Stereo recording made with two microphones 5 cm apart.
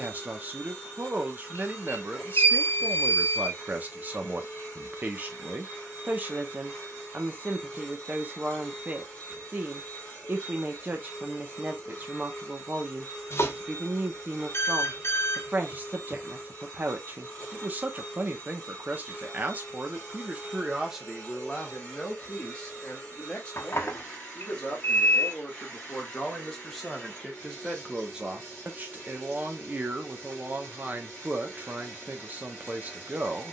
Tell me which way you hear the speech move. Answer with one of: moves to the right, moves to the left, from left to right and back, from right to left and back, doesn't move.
from right to left and back.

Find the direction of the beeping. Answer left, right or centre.
left.